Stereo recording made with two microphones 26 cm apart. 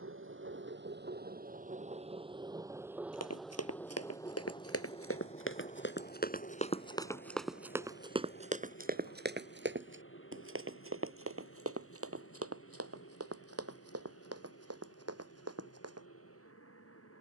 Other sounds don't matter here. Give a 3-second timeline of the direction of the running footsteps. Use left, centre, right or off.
off, left, centre, right, right, right.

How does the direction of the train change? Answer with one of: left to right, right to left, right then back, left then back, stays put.
right to left.